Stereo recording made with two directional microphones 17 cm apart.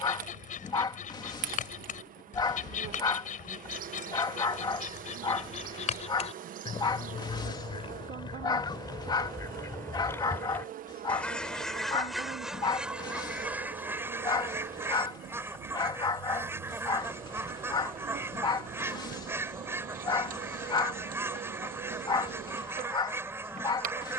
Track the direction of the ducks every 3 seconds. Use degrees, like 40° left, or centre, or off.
50° left, 50° left, 30° left, 10° left, 10° right, 10° right, 10° right, 10° right.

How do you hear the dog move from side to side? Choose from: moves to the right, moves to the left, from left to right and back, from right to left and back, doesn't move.
doesn't move.